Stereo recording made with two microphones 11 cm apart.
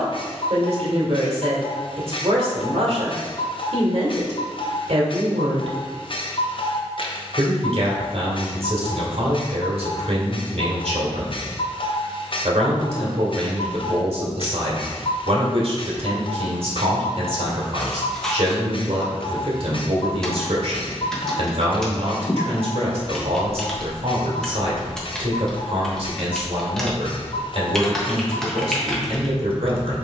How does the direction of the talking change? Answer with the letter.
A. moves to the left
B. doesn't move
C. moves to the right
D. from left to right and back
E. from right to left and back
B.